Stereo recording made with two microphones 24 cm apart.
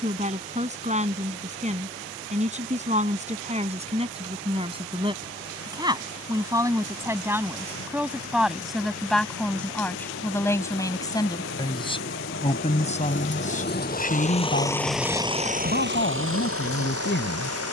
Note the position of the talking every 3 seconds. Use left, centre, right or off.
right, right, centre, centre, left, left.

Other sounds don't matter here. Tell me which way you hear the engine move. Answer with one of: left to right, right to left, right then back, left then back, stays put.
left to right.